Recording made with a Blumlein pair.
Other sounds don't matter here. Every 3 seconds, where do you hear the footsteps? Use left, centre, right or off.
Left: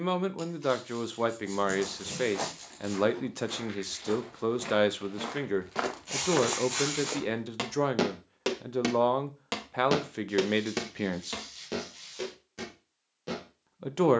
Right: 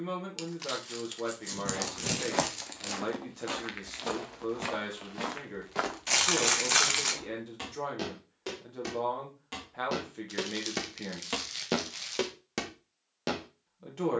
right, right, left, centre, right.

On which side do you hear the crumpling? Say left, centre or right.
right.